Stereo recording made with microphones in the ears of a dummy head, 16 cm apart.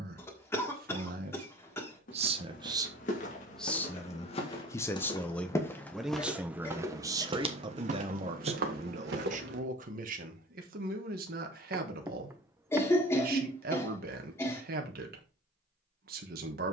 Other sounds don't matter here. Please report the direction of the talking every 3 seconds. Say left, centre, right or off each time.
right, centre, right, right, right, right.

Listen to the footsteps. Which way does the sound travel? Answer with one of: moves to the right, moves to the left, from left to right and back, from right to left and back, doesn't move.
moves to the right.